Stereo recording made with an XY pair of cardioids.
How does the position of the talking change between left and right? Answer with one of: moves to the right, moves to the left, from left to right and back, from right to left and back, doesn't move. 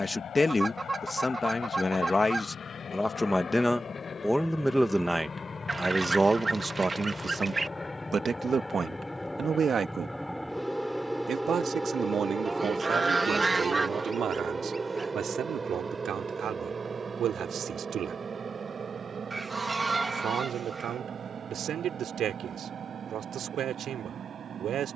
moves to the right.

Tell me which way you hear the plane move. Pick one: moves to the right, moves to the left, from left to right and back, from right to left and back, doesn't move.
moves to the right.